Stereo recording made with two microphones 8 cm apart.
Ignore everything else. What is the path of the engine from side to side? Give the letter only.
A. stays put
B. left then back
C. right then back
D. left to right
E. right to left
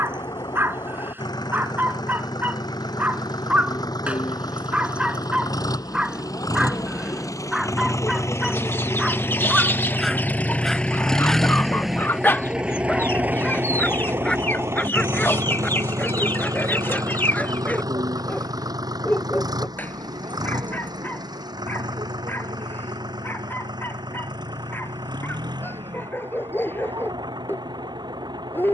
D.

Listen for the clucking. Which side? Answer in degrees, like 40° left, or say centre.
30° left.